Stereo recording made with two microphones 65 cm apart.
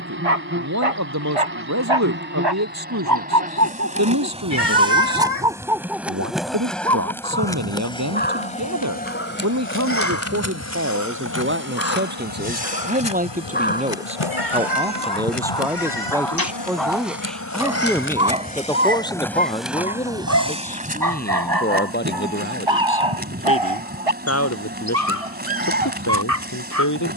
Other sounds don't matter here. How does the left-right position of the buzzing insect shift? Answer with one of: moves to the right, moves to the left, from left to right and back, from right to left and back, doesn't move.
from right to left and back.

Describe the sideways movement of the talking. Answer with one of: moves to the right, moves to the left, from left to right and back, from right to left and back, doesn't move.
moves to the left.